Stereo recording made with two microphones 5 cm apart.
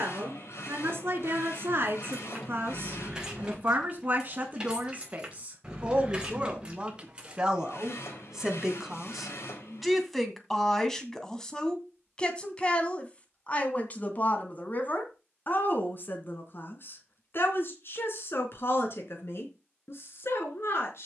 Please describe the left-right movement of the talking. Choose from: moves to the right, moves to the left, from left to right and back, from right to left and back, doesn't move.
moves to the left.